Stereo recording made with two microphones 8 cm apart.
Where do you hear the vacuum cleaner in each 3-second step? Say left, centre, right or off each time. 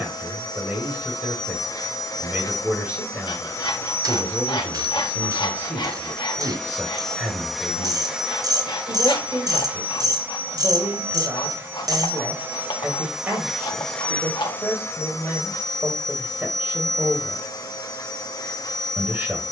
left, left, centre, right, centre, left, left.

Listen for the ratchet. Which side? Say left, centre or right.
right.